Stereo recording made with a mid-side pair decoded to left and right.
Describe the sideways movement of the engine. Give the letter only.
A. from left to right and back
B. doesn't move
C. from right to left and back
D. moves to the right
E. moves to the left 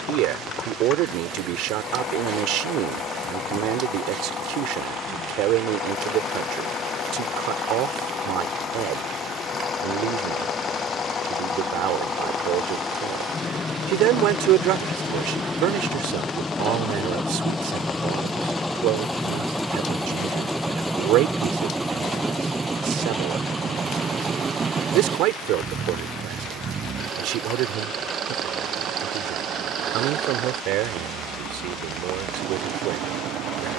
D.